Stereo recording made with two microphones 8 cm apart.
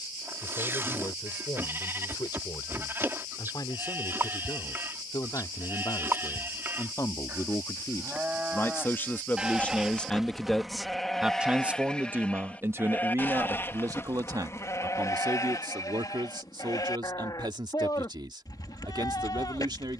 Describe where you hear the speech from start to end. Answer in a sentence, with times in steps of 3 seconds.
In this clip you hear the speech on the left from 0 s, in the centre from 9 s and on the right from 12 s.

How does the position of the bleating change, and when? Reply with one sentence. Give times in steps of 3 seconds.
In this clip you hear the bleating on the right from 0 s, in the centre from 9 s and on the left from 12 s.